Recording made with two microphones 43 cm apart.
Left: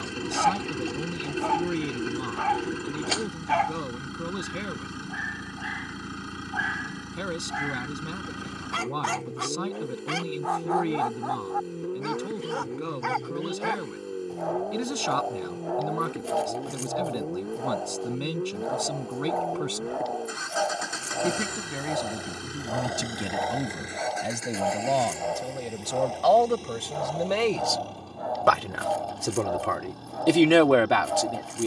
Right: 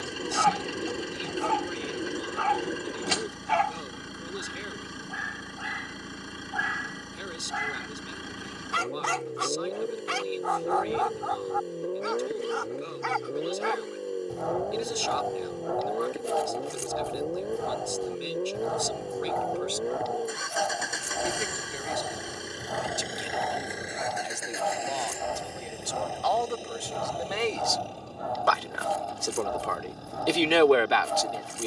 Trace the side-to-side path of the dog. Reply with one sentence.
In this clip you hear the dog stay put.